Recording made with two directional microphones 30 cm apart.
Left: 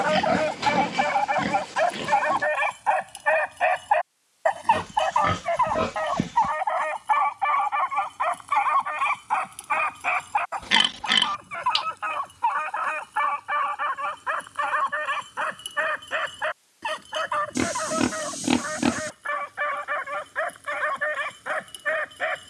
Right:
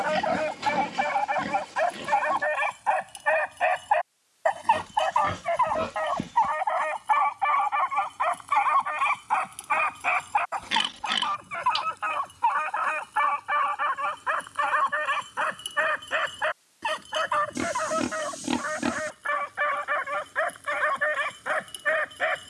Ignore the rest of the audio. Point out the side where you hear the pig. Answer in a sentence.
In this clip you hear the pig on the left.